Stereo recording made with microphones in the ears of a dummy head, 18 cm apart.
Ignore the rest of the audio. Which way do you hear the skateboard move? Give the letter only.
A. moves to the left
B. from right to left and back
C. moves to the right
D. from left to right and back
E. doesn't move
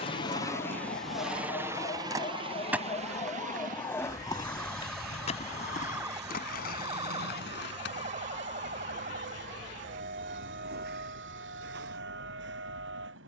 A.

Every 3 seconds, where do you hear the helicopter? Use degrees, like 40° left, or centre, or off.
10° right, 40° right, 60° right, 60° right, 60° right.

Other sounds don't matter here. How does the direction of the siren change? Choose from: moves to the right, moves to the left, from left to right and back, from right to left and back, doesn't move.
moves to the right.